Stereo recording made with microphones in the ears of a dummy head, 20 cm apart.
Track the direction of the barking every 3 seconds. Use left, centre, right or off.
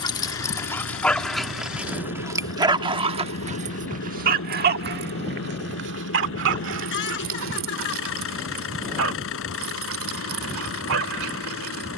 centre, right, right, right.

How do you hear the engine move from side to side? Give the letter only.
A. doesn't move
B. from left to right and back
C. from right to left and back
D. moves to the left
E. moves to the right
A.